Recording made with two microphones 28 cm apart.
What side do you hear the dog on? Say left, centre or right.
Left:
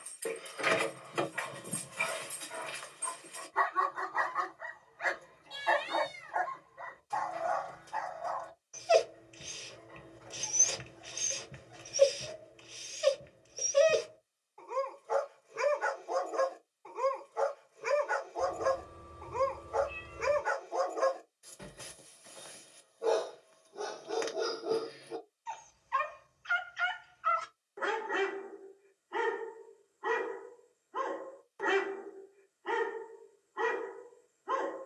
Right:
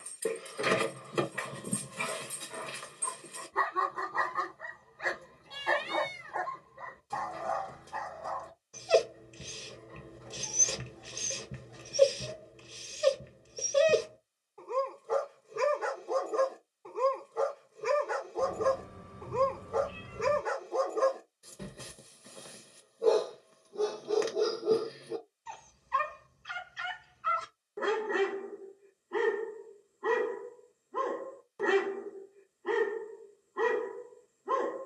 right.